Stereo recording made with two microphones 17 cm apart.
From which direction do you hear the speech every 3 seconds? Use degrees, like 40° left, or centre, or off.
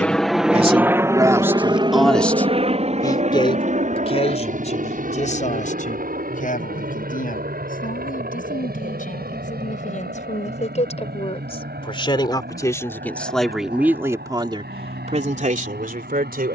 20° right, 40° left, 50° left, 40° left, centre, 50° right.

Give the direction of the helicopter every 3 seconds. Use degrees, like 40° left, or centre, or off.
20° right, 50° right, 60° right, 60° right, 60° right, 60° right.